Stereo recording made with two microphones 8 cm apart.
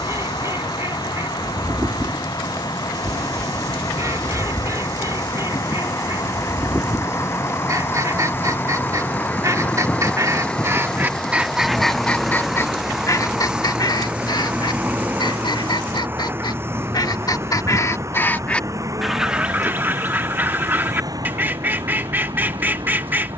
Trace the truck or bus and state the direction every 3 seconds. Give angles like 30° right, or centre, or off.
60° left, 50° left, 30° left, 10° left, 10° right, 30° right, 40° right, 50° right.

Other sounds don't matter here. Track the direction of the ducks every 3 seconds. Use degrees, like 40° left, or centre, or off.
40° right, 40° right, 40° right, 30° right, 50° left, 60° left, 10° right, 20° right.